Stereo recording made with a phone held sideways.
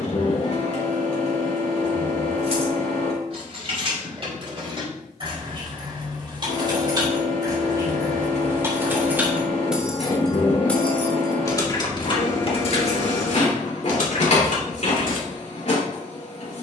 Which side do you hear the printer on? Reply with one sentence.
You can hear the printer on the left.